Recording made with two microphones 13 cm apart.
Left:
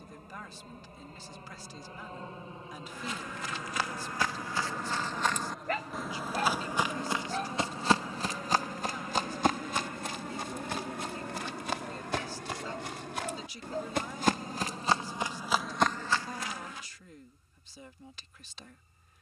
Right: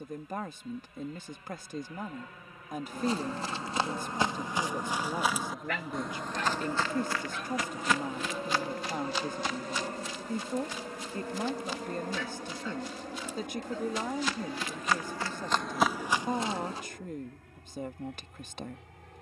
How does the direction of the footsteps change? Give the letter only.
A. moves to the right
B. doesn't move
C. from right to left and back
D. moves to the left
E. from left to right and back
C.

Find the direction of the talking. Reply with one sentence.
In this clip you hear the talking on the right.